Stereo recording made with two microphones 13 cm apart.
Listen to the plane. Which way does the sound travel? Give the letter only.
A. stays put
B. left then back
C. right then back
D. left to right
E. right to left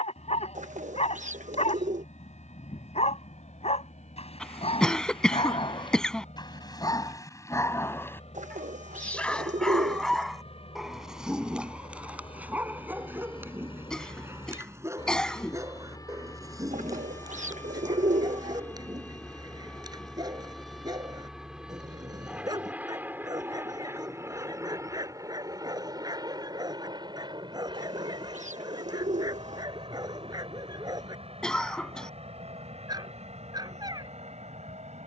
D.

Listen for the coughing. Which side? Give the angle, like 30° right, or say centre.
10° left.